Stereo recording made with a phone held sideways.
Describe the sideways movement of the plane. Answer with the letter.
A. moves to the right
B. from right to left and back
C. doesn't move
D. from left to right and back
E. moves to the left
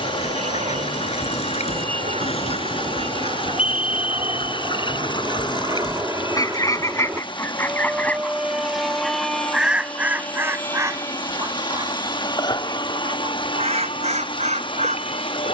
E.